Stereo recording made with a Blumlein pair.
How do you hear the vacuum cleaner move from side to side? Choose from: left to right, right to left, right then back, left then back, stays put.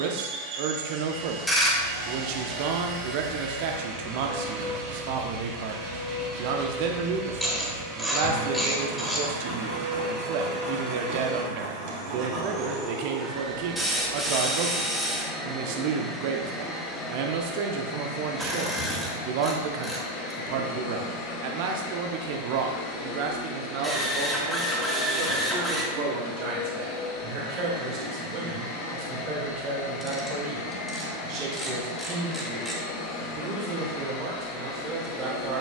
right to left.